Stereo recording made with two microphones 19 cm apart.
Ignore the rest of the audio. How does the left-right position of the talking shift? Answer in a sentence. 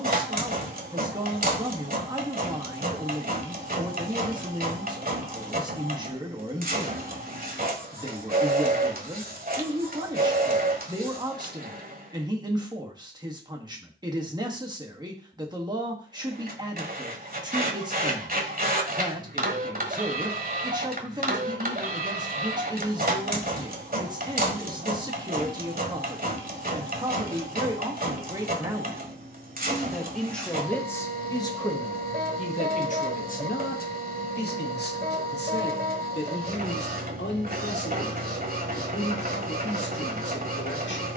In this clip you hear the talking go from the right side to the left.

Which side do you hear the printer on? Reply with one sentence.
In this clip you hear the printer on the right.